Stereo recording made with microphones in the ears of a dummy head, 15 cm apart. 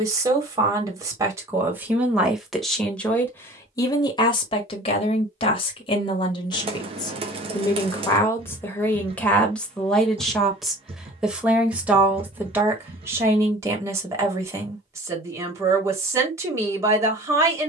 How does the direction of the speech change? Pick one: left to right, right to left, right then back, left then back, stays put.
left then back.